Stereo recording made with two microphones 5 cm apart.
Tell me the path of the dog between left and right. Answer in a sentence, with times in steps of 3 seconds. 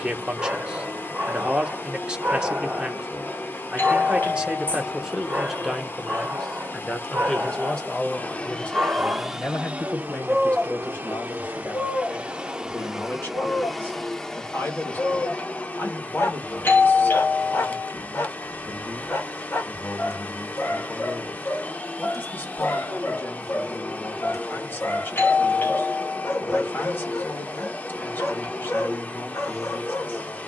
In this clip you hear the dog on the right from 0 s, in the centre from 9 s and on the left from 12 s.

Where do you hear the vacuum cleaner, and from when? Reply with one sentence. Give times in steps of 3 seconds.
In this clip you hear the vacuum cleaner on the left from 0 s, on the right from 9 s, in the centre from 12 s and on the left from 15 s.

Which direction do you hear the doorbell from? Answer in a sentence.
You can hear the doorbell on the left.